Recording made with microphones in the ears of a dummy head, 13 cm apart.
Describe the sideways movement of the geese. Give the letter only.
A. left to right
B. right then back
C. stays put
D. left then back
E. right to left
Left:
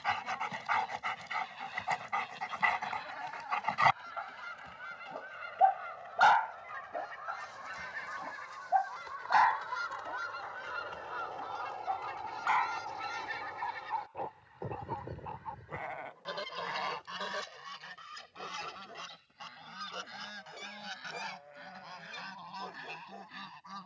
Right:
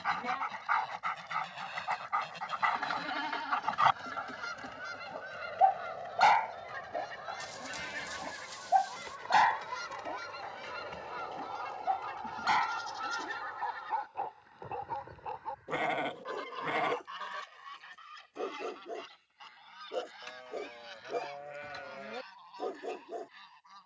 E.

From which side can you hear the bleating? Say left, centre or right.
right.